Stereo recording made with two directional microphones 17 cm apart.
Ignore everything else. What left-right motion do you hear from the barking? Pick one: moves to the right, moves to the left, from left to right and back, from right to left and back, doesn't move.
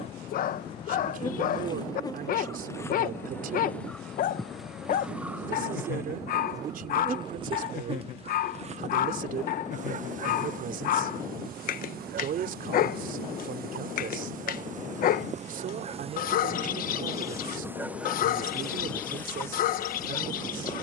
doesn't move.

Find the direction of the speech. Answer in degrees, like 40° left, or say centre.
60° right.